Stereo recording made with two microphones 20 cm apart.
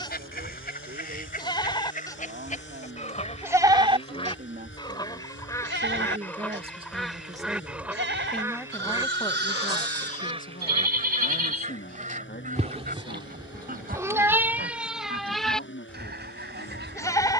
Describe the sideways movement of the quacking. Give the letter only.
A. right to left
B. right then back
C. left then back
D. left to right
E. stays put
D.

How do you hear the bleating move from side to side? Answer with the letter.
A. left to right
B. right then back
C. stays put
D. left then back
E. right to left
B.